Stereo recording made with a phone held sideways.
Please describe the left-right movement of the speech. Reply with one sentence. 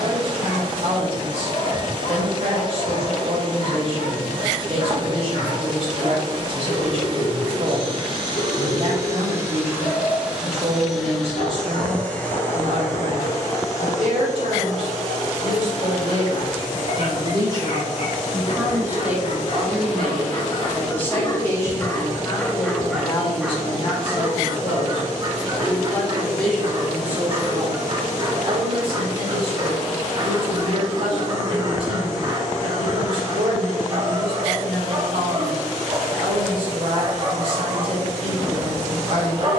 You can hear the speech move from right to left and back again.